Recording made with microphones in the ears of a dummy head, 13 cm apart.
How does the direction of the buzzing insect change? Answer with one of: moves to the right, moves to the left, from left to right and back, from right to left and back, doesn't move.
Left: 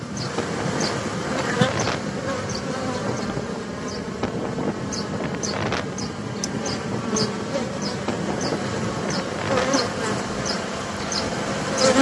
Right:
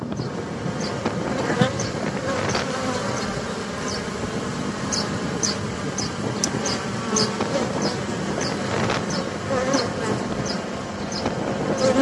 from left to right and back.